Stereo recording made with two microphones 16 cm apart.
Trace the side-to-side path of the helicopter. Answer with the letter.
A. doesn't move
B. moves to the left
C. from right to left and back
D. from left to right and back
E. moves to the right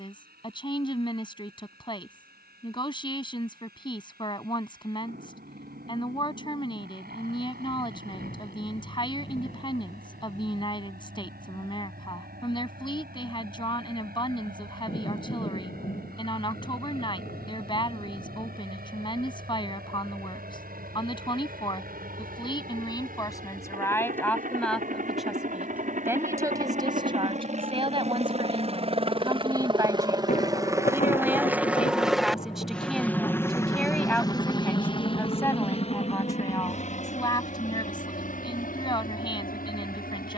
B.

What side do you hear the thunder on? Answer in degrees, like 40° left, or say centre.
50° left.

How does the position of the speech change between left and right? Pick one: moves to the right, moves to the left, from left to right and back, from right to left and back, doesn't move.
from left to right and back.